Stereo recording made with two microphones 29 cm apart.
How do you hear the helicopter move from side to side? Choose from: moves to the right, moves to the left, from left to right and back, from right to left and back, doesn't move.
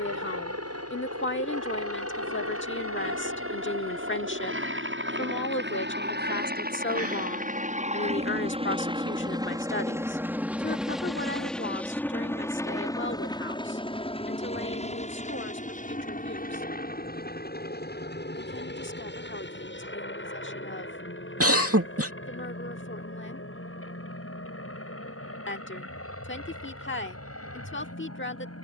moves to the left.